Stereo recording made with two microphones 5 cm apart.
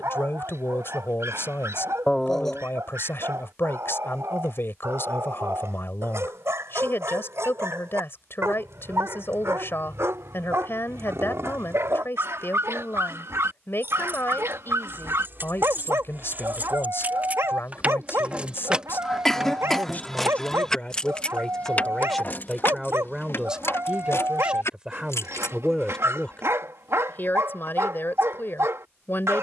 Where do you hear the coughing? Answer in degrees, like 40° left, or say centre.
10° left.